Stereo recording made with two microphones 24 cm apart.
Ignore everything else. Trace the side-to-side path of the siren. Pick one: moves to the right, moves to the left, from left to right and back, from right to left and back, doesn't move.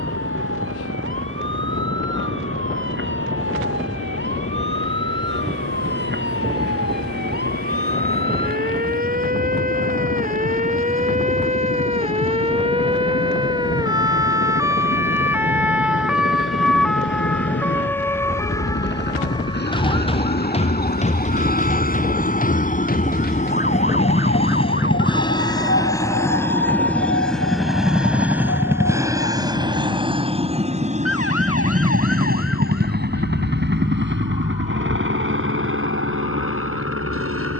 moves to the left.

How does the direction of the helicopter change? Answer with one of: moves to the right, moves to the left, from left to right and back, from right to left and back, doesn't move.
moves to the right.